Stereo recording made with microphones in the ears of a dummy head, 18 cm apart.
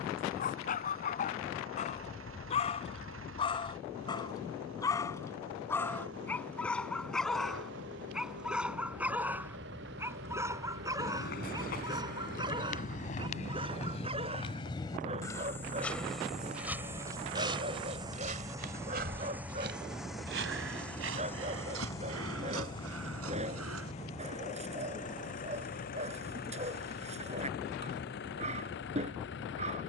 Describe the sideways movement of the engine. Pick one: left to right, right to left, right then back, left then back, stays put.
right to left.